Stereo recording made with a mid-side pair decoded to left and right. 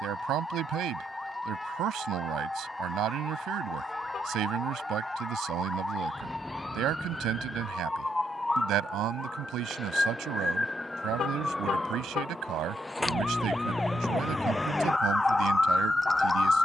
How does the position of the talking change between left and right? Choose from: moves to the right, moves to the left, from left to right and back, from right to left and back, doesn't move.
doesn't move.